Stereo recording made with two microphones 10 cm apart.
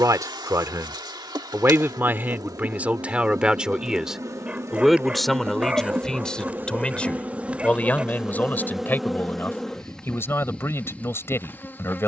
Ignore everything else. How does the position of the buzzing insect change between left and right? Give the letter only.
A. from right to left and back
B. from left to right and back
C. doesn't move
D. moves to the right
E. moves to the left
E.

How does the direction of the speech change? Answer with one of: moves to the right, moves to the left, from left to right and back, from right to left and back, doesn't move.
moves to the left.